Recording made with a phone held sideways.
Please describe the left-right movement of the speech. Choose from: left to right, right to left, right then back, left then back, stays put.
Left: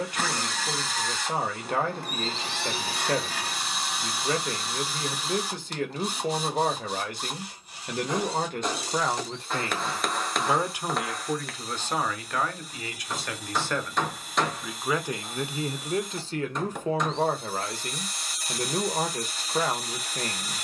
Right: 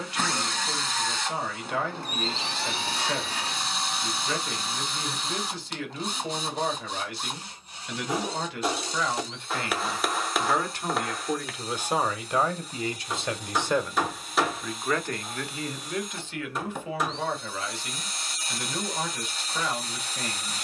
right then back.